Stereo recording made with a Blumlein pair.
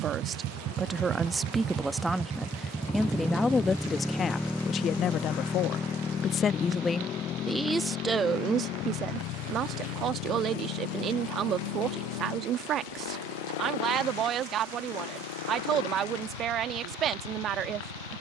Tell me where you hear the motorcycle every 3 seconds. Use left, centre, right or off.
right, centre, left, left, left, left.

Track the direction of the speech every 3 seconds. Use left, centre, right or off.
centre, left, centre, right, right, right.